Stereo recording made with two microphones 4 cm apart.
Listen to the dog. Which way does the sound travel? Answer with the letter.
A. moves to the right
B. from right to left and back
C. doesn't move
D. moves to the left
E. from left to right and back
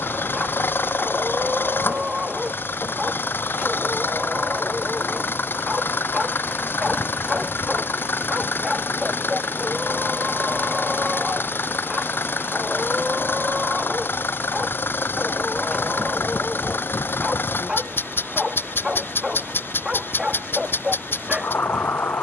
C.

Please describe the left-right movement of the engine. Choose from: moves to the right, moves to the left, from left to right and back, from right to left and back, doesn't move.
doesn't move.